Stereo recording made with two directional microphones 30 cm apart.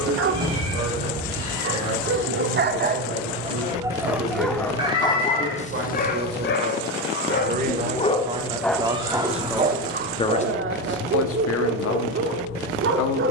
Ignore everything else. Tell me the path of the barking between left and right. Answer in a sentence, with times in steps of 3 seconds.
You can hear the barking on the right from 0 s, in the centre from 3 s, on the left from 6 s and on the right from 9 s.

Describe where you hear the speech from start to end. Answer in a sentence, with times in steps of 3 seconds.
In this clip you hear the speech on the right from 0 s and on the left from 9 s.